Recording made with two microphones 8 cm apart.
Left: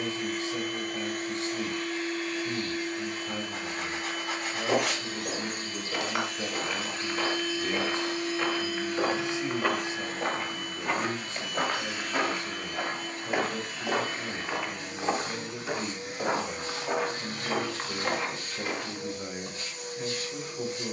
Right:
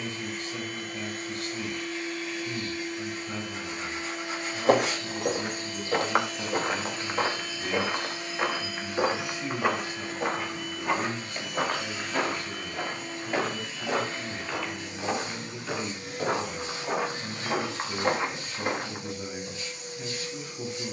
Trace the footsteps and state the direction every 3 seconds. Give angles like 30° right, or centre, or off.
off, 40° right, 30° right, centre, 10° left, centre, 30° right.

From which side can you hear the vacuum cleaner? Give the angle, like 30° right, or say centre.
40° left.